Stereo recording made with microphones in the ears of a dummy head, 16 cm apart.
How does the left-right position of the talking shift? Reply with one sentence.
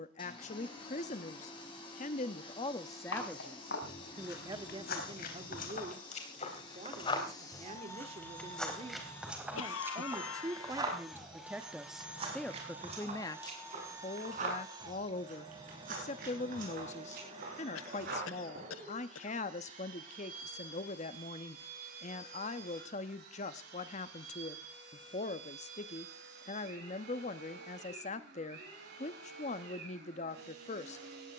You can hear the talking go right and come back.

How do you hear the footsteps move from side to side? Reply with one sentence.
You can hear the footsteps move from left to right.